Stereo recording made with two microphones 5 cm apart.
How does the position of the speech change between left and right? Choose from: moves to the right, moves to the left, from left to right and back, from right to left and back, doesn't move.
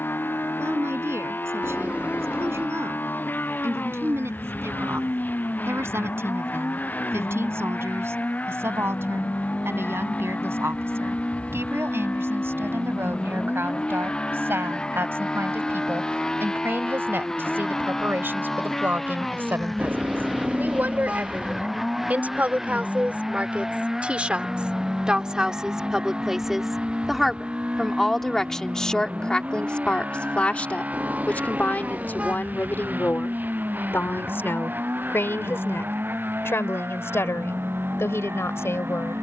moves to the left.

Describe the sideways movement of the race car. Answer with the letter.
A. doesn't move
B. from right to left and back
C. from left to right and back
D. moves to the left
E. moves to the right
E.